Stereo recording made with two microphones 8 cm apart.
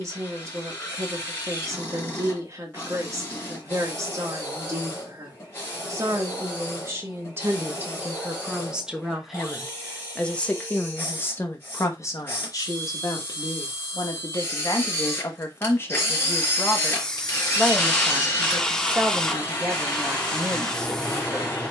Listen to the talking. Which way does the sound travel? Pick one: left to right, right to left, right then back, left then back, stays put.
left then back.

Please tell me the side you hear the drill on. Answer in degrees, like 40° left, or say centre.
30° left.